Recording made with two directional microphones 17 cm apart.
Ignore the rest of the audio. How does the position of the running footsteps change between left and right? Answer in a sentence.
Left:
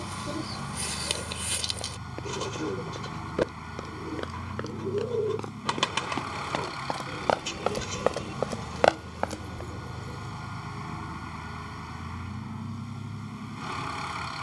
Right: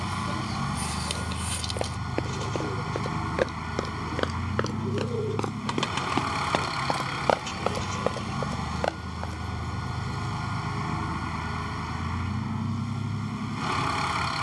You can hear the running footsteps travel towards the left.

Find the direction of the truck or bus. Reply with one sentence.
In this clip you hear the truck or bus on the right.